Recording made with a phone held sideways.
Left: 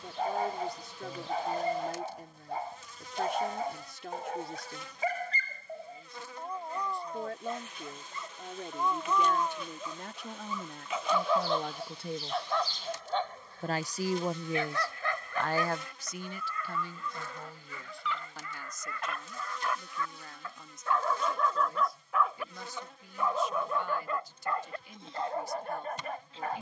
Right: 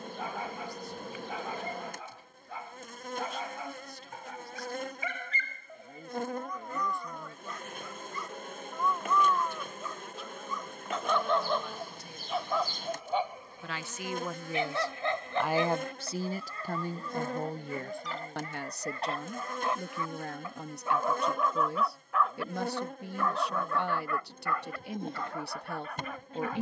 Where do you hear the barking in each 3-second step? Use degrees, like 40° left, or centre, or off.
40° left, 40° left, 30° left, 10° left, 10° right, 30° right, 30° right, centre, 30° left.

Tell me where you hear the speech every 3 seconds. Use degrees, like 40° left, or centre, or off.
70° left, 70° left, 70° left, 70° left, 30° left, 40° right, 70° right, 70° right, 70° right.